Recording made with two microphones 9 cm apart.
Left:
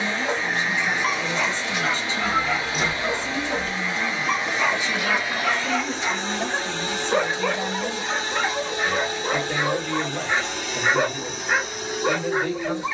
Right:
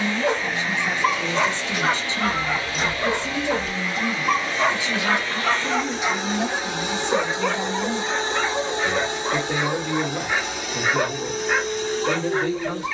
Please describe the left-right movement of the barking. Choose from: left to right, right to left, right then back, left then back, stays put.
right to left.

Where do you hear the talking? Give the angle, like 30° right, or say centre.
20° right.